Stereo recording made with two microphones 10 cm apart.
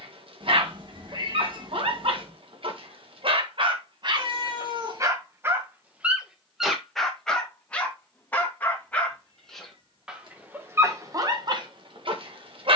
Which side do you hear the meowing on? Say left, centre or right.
right.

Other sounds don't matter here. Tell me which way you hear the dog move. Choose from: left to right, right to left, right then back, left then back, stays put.
left then back.